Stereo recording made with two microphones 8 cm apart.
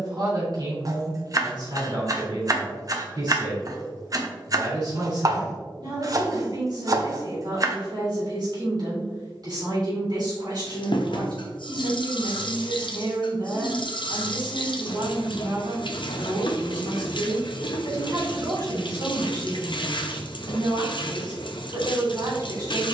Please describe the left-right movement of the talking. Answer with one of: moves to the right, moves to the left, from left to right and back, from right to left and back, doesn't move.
doesn't move.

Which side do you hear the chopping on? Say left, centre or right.
right.